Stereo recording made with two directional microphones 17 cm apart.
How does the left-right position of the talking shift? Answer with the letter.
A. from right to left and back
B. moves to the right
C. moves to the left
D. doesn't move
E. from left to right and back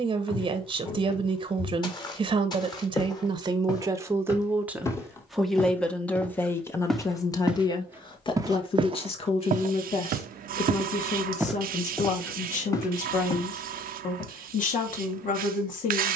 C.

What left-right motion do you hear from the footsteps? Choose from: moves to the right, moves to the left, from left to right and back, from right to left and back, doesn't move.
from left to right and back.